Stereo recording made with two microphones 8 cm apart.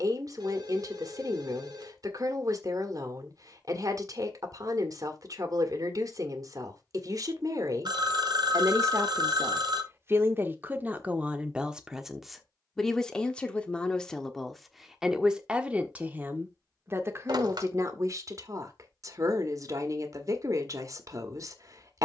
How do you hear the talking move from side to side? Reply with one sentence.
You can hear the talking go left and come back.